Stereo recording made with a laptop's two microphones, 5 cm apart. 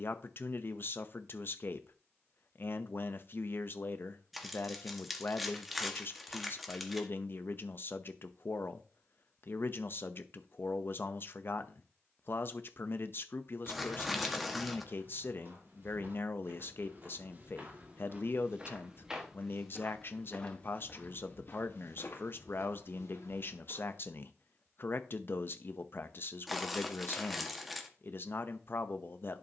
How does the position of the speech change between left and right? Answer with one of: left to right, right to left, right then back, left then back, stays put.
stays put.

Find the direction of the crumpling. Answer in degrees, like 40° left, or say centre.
centre.